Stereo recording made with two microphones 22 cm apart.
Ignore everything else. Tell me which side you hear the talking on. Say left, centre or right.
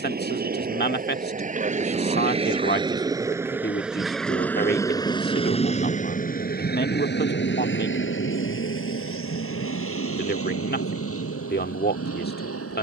left.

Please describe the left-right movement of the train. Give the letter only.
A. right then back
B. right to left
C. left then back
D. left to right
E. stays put
B.